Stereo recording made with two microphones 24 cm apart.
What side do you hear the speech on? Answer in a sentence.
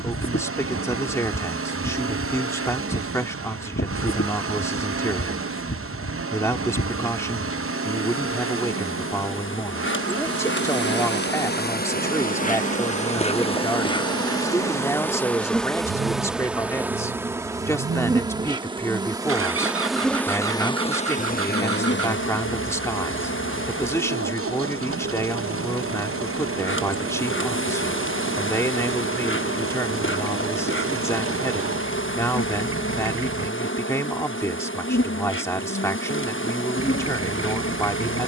You can hear the speech in the centre.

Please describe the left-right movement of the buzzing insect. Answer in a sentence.
In this clip you hear the buzzing insect go right and come back.